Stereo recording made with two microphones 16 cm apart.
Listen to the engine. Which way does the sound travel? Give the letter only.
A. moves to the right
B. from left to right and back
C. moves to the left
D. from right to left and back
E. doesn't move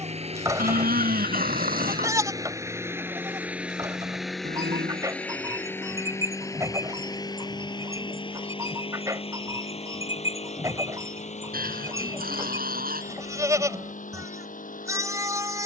C.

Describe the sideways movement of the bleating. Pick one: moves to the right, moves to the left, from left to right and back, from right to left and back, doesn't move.
doesn't move.